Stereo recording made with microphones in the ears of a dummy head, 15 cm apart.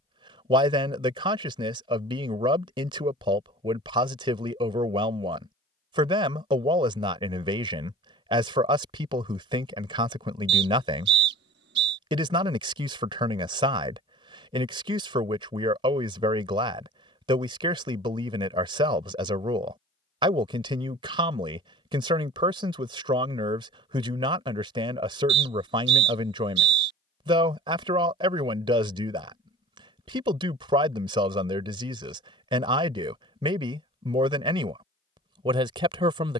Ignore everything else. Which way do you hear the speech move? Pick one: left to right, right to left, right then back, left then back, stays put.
stays put.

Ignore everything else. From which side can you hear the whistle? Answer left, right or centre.
right.